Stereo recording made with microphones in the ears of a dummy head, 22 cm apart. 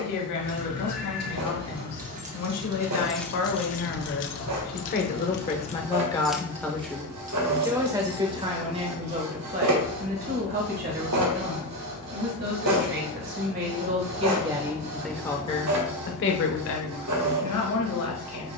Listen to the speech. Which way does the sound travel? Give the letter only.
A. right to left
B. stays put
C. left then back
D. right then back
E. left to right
D.